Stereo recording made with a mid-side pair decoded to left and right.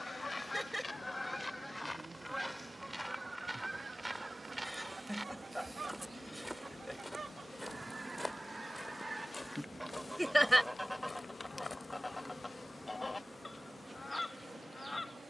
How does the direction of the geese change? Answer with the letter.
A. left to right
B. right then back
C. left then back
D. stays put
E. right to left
B.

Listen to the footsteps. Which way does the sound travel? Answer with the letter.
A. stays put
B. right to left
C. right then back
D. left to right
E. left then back
C.